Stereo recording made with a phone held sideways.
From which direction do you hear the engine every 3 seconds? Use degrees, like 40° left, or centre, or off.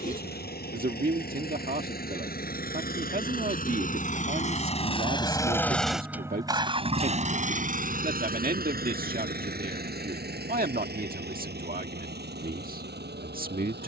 70° left, 40° left, 40° right, 70° right, 80° right.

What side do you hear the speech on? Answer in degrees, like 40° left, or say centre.
60° right.